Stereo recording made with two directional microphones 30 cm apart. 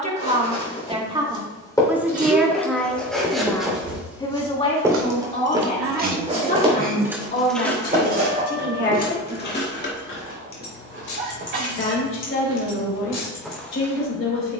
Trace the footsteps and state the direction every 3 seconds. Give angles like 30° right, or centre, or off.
10° left, 10° right, 30° right, 40° right, centre.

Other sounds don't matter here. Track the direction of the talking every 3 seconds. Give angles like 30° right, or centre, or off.
10° right, 20° left, 30° left, 40° left, 40° left.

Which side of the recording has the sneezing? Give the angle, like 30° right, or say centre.
40° right.